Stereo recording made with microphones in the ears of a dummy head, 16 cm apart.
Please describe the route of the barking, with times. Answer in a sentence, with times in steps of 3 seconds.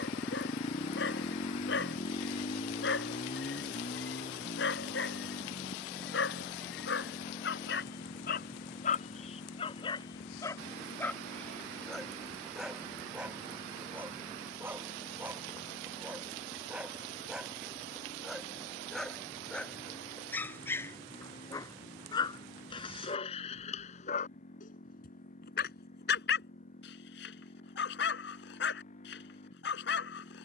In this clip you hear the barking on the left from 0 s, in the centre from 12 s and on the left from 21 s.